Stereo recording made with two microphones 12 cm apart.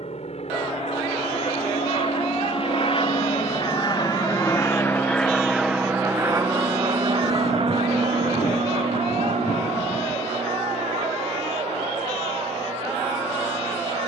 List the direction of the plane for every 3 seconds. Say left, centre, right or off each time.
left, left, right, right, right.